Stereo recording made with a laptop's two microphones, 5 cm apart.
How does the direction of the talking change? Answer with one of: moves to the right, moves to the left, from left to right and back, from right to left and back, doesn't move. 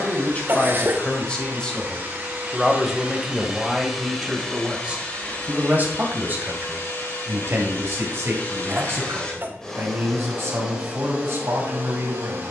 moves to the right.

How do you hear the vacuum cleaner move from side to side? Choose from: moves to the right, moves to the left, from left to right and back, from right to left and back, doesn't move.
from right to left and back.